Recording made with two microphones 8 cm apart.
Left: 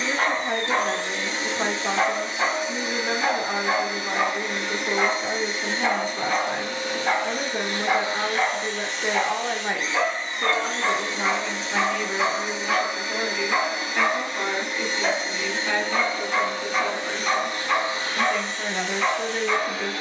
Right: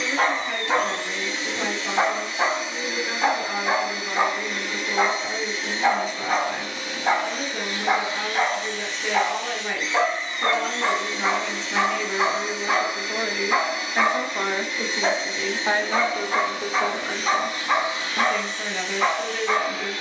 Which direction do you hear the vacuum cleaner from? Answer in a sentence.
In this clip you hear the vacuum cleaner on the left.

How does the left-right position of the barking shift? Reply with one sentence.
You can hear the barking stay put.